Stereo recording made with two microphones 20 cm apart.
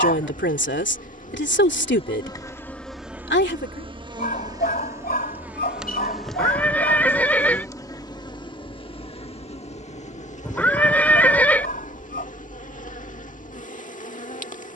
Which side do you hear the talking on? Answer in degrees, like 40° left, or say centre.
60° left.